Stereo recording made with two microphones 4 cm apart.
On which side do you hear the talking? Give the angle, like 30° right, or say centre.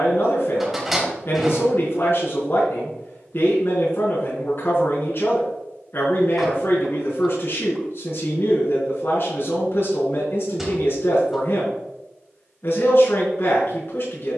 50° left.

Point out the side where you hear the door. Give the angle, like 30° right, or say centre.
10° right.